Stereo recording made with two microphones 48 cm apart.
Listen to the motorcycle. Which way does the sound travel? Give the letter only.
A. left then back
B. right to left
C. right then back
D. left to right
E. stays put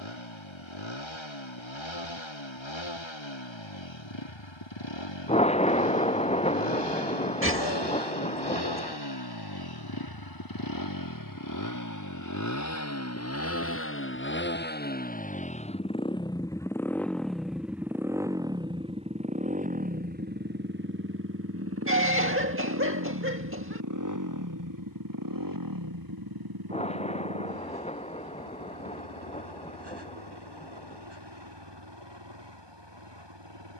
D.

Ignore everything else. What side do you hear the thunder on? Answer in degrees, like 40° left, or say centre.
10° left.